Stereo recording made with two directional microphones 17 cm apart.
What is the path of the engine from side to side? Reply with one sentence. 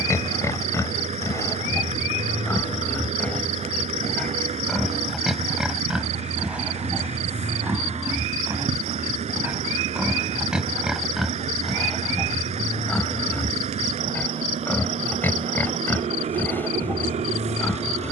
You can hear the engine stay put.